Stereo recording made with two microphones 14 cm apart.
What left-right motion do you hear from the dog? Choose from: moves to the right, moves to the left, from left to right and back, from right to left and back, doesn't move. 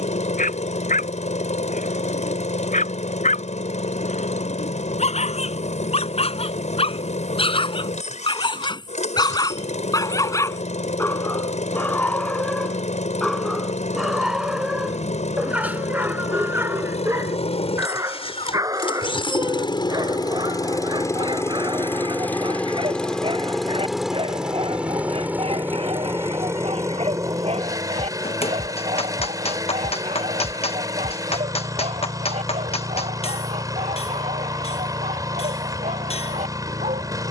moves to the right.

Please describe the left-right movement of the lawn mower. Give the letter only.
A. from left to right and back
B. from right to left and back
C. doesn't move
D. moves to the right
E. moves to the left
D.